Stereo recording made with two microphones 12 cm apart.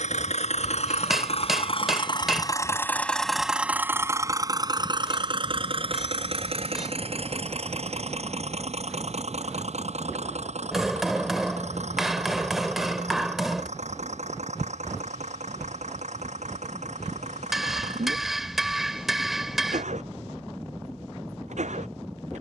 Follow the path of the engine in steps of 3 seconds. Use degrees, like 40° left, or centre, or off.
50° left, 30° right, 60° right, 70° right, 70° right, 70° right, 70° right, 70° right.